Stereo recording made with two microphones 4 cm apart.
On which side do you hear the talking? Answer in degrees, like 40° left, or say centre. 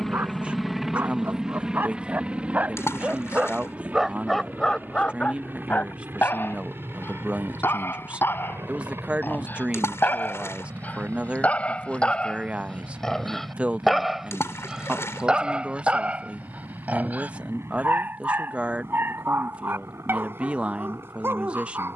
30° right.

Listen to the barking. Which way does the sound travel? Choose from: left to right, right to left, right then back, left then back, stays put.
left then back.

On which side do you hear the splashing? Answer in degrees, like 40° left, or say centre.
80° left.